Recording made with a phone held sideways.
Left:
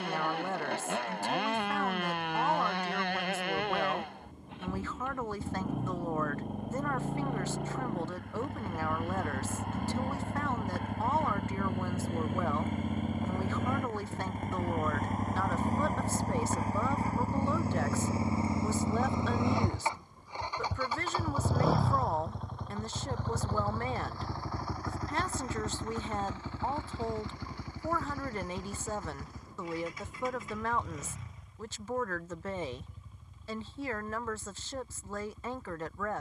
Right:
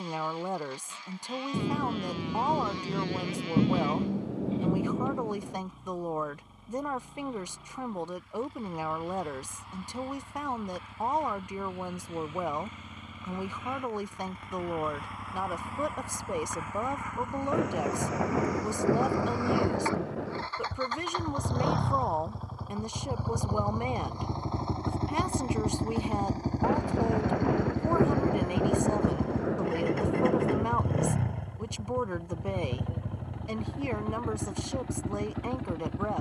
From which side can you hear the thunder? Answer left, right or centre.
right.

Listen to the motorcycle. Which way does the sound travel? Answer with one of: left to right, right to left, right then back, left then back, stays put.
left to right.